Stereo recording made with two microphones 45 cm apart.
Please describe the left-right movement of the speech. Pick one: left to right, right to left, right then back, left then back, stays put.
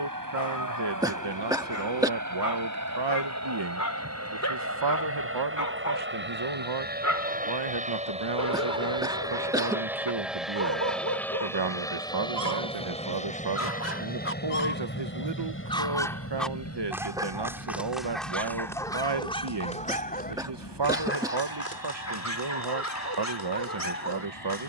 stays put.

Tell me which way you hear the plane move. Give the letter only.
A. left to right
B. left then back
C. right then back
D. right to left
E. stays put
D.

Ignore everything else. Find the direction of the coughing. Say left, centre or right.
centre.